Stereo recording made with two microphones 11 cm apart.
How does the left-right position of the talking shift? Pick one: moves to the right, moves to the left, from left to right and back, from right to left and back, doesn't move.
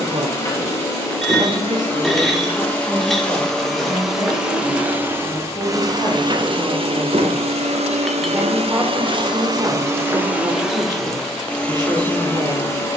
from right to left and back.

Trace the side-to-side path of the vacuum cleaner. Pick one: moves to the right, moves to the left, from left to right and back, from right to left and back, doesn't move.
from left to right and back.